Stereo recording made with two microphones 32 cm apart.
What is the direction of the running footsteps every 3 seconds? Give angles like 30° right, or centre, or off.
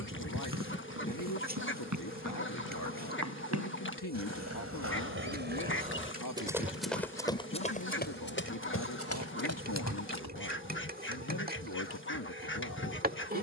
70° right, 40° right, 20° left, 50° left, off.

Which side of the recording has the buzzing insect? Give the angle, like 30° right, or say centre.
30° right.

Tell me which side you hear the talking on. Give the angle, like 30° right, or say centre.
80° left.